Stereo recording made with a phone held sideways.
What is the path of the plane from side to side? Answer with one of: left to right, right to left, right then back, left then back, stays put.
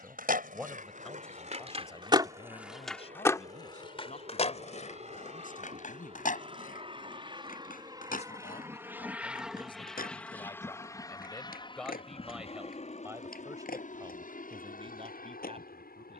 right to left.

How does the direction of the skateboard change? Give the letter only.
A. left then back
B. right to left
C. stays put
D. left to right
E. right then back
B.